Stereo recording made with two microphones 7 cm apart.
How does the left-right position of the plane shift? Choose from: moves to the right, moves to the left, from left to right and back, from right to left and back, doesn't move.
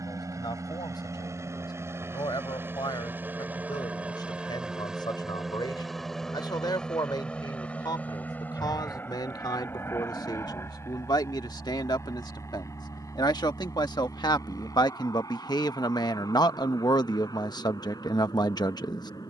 moves to the left.